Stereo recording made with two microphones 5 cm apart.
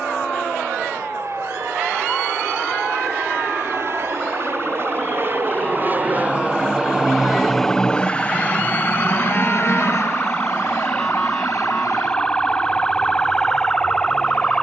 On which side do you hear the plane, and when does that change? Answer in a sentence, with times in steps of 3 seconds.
In this clip you hear the plane on the right from 0 s, in the centre from 6 s and on the left from 9 s.